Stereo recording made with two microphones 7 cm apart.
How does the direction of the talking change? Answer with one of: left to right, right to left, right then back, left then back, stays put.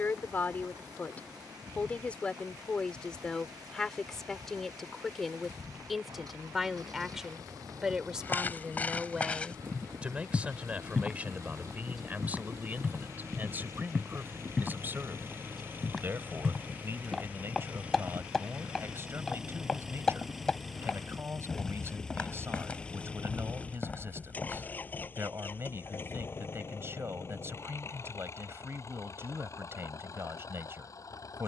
left to right.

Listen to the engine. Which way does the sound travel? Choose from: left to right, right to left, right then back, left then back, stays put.
right to left.